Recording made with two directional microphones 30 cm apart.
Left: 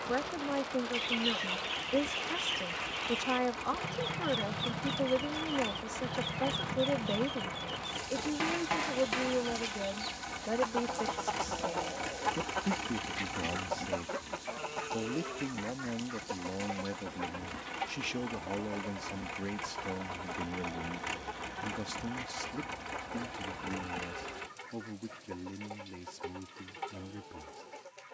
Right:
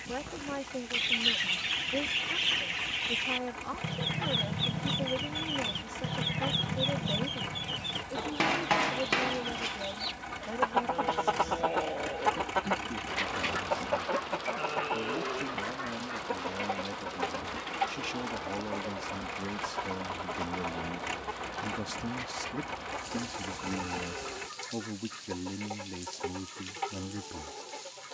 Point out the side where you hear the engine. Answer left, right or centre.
centre.